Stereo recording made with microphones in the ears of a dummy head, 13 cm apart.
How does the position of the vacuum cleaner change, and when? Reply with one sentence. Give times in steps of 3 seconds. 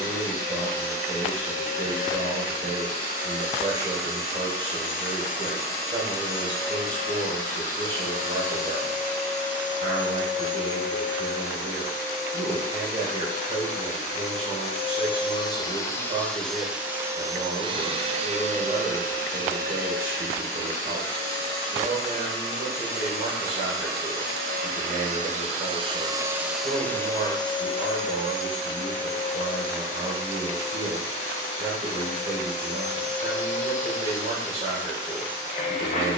You can hear the vacuum cleaner on the left from 0 s, in the centre from 15 s, on the right from 18 s and on the left from 27 s.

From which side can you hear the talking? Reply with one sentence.
You can hear the talking on the right.